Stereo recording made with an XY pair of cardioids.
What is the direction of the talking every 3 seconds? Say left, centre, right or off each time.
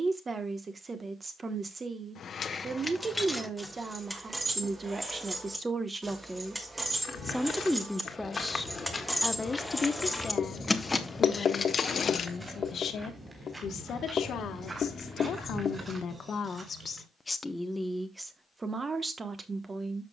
right, right, centre, left, left, left, right.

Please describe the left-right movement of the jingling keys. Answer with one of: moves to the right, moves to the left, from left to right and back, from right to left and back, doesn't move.
from left to right and back.